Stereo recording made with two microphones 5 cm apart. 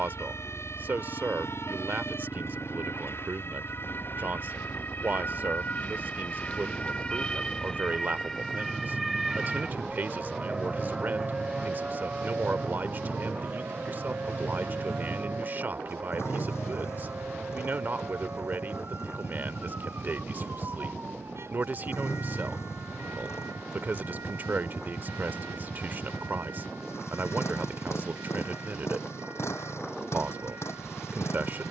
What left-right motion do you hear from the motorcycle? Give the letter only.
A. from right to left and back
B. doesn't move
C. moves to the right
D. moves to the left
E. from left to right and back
B.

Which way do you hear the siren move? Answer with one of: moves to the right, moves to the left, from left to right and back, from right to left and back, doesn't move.
moves to the right.